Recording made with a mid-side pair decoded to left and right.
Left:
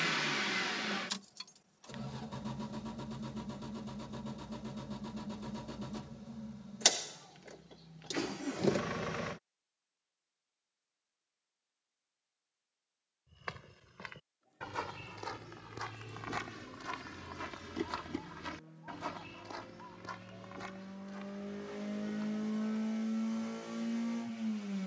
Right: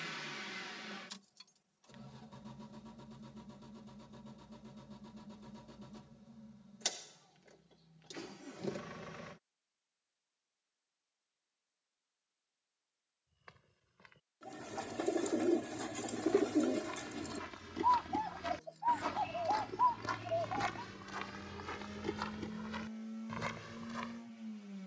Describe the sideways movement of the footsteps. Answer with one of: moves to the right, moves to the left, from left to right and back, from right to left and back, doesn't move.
moves to the right.